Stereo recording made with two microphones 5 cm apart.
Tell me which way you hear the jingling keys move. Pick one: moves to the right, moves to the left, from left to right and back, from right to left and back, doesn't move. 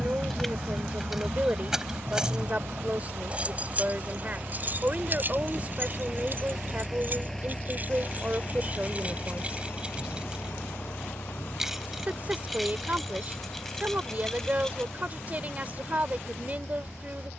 from left to right and back.